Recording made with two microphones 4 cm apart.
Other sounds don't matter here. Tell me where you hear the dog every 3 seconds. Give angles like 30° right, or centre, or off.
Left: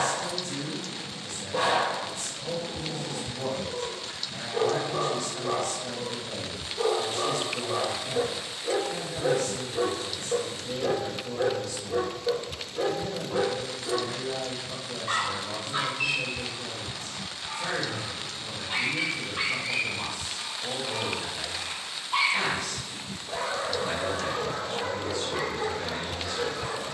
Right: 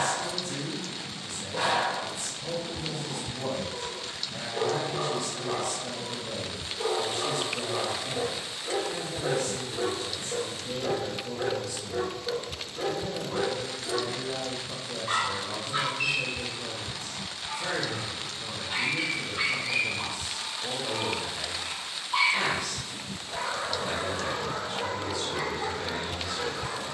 30° left, 30° left, 30° left, 30° left, 30° left, centre, 20° left, 30° left, 30° left.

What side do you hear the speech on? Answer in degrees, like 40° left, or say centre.
10° right.